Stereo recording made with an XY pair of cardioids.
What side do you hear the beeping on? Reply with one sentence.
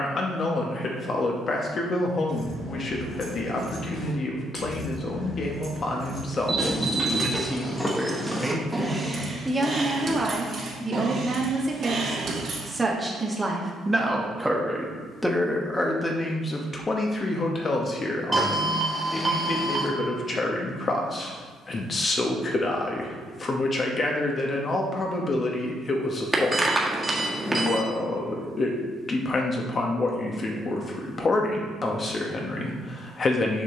You can hear the beeping in the centre.